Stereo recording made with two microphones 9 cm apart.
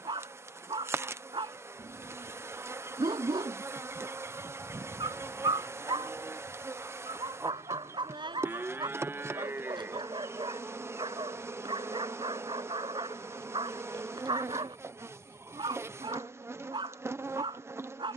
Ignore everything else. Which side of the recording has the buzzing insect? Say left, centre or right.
right.